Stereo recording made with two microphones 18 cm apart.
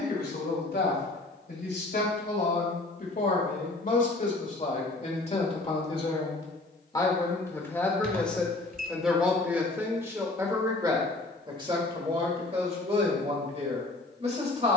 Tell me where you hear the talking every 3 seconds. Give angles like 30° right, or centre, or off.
60° left, 40° left, 10° left, 20° right, 40° right.